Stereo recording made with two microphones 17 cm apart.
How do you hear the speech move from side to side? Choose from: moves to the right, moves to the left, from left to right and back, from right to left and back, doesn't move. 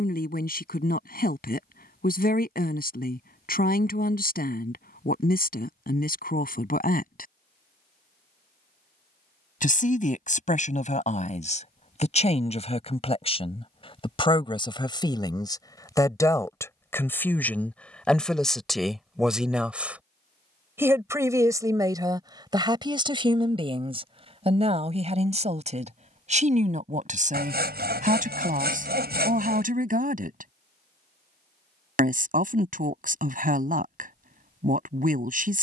moves to the right.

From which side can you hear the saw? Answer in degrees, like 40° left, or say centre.
70° right.